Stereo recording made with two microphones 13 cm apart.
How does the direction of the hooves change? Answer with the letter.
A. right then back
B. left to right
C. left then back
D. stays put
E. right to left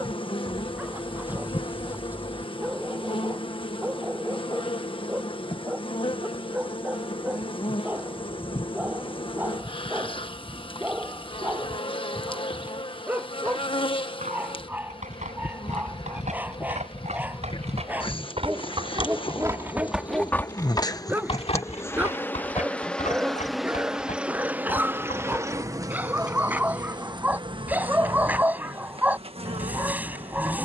E.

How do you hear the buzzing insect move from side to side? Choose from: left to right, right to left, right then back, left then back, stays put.
left to right.